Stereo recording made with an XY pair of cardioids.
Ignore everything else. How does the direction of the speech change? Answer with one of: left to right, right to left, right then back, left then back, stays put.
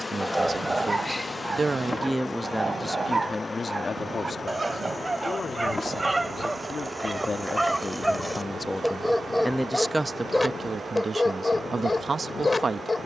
left then back.